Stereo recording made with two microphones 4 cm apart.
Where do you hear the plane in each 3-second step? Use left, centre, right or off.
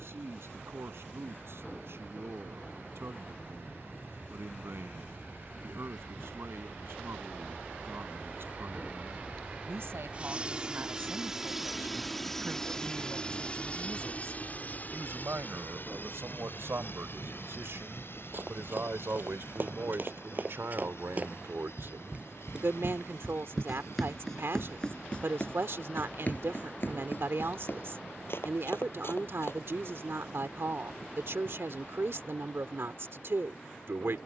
right, right, right, right, left, left, left, left, left, left, left, left.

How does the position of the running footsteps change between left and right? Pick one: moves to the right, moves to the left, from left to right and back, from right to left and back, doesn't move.
moves to the left.